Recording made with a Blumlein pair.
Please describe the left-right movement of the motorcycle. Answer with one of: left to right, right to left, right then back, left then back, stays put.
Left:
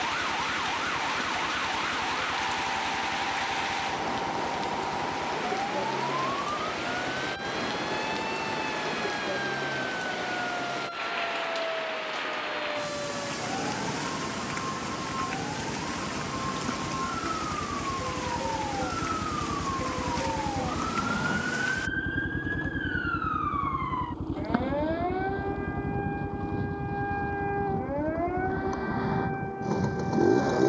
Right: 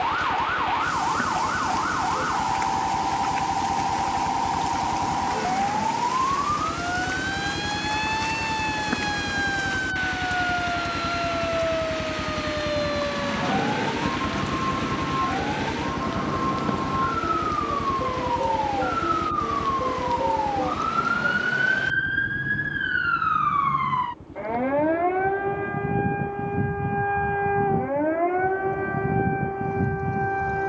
right to left.